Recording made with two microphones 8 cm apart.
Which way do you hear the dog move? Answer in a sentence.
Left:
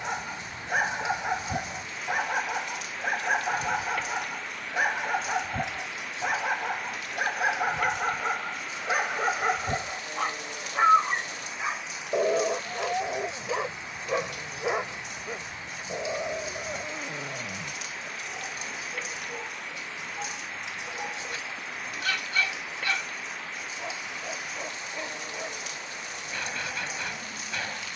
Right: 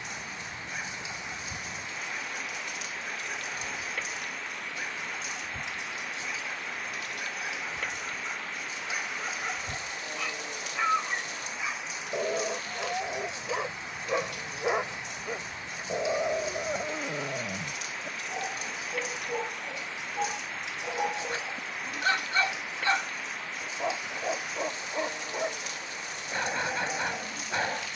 In this clip you hear the dog move to the right.